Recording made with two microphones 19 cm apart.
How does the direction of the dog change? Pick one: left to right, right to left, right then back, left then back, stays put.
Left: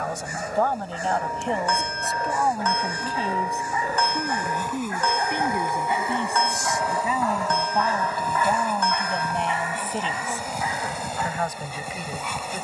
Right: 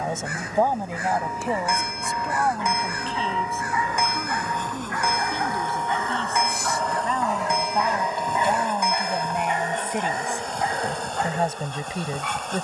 left to right.